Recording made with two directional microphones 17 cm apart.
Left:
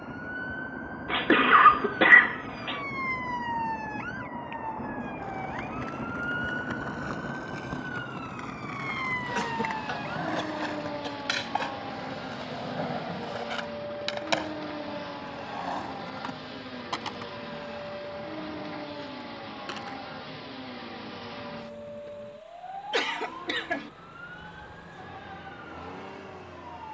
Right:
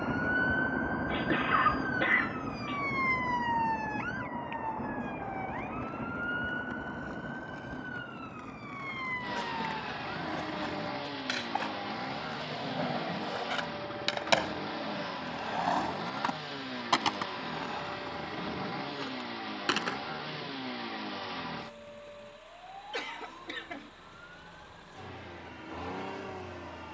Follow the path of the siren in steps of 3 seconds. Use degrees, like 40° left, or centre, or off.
30° right, centre, 20° left, 30° left, 40° left, 40° left, 50° left, 50° left, 50° left.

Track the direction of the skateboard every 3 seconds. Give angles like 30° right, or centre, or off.
off, 70° left, 60° left, 40° left, centre, 30° right, 50° right, off, off.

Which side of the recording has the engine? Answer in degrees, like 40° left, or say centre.
20° right.